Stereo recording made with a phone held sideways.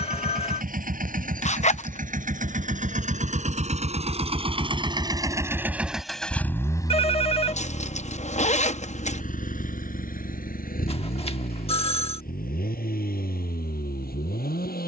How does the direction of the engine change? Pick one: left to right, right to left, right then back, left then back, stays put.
right to left.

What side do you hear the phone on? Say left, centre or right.
left.